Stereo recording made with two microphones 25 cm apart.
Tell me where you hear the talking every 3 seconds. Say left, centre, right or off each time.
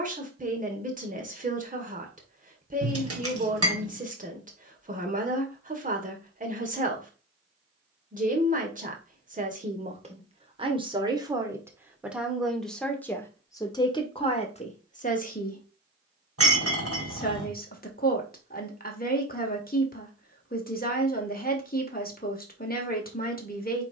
right, right, right, right, centre, left, left, left.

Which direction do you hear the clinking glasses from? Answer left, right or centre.
right.